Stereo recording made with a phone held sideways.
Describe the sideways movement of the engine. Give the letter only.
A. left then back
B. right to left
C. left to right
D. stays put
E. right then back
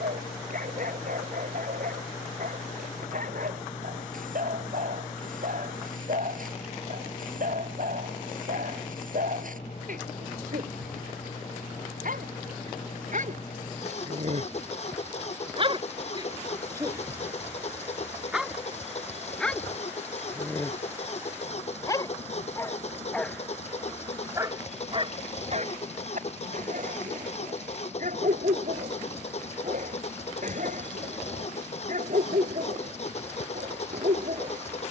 D.